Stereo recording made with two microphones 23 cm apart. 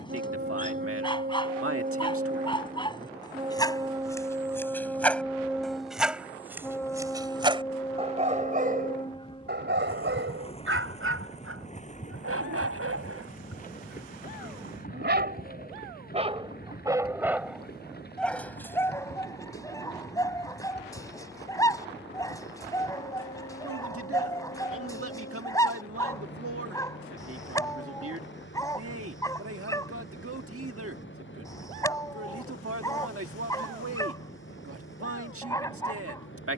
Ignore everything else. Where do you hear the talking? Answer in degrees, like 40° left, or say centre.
70° right.